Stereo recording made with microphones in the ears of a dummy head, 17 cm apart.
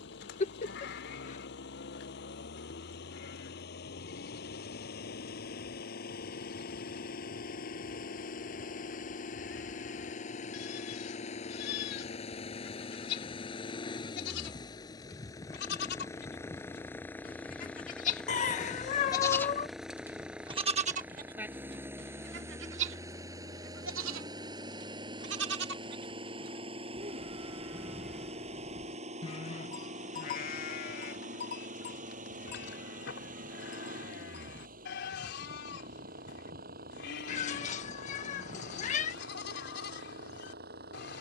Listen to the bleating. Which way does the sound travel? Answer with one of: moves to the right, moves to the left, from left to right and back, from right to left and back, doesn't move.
from left to right and back.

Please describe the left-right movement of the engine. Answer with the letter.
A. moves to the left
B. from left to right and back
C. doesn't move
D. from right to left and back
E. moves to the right
E.